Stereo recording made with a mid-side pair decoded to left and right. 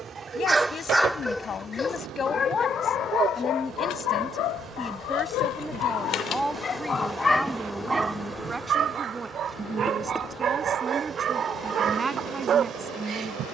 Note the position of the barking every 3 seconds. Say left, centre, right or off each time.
centre, left, centre, right, right.